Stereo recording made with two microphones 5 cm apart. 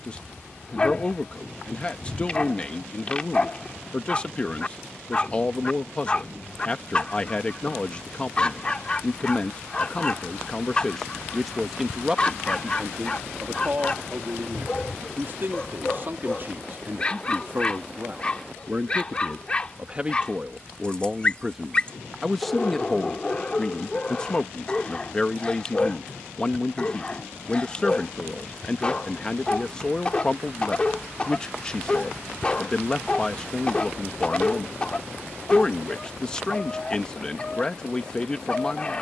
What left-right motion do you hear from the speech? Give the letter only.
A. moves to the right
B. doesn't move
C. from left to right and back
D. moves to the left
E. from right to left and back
C.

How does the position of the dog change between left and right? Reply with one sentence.
You can hear the dog stay put.